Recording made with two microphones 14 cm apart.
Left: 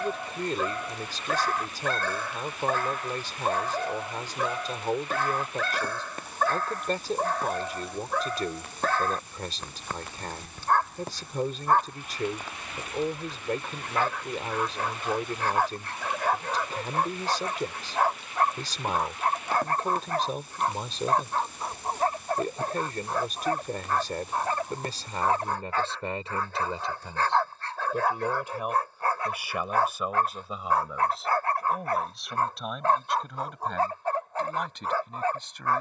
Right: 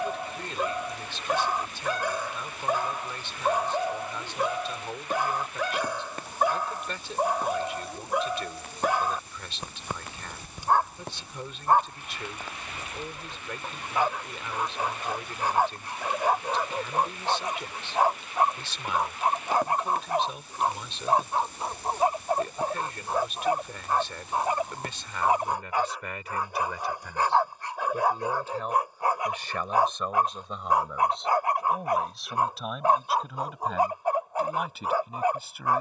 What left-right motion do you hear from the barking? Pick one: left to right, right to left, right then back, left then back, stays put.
stays put.